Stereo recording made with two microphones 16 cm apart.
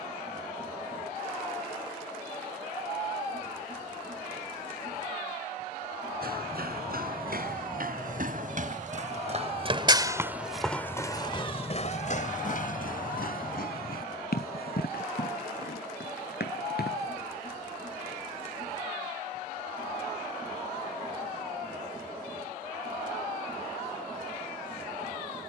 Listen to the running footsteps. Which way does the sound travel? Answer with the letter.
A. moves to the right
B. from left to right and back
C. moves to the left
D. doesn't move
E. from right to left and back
C.